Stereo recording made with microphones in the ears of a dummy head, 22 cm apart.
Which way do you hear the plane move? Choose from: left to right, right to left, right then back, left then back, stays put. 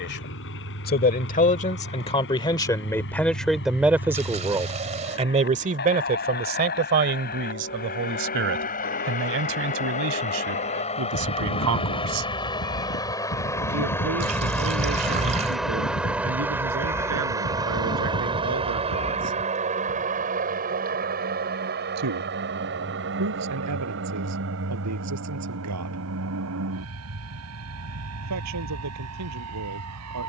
left to right.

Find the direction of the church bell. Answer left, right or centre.
left.